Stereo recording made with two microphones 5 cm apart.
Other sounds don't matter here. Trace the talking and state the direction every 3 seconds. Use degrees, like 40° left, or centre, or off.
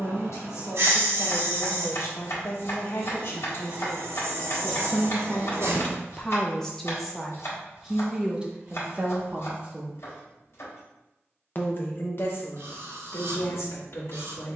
60° left, 40° left, centre, centre, 60° left.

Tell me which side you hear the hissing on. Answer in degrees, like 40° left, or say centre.
60° right.